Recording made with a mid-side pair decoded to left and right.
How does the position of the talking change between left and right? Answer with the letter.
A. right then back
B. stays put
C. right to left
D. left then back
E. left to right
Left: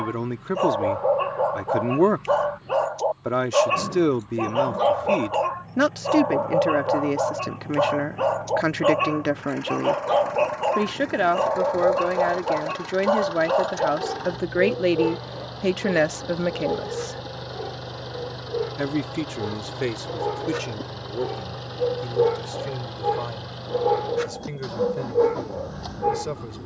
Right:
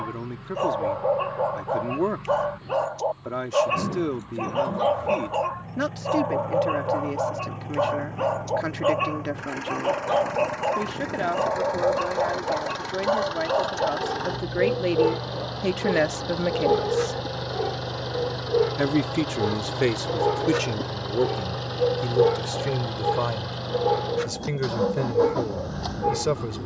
E.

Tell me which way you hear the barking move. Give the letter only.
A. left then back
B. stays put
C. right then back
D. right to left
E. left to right
C.